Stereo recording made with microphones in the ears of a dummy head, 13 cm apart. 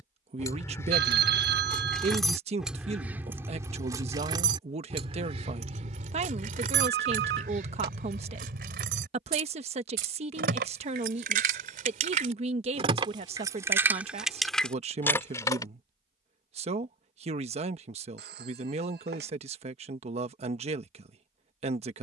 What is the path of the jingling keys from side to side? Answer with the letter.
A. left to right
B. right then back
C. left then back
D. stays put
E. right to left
B.